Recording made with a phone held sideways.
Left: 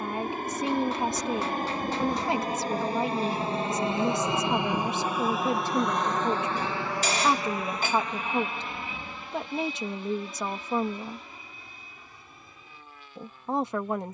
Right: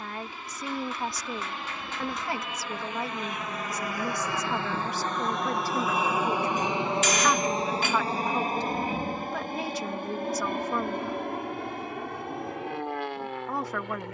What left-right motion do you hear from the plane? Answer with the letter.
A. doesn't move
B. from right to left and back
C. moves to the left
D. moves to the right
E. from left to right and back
D.